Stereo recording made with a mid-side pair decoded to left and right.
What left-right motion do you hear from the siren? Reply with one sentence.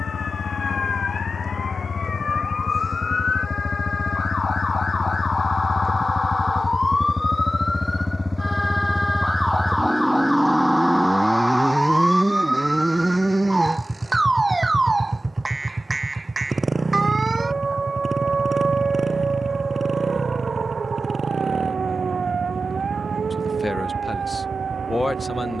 You can hear the siren move to the right.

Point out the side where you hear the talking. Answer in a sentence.
You can hear the talking on the left.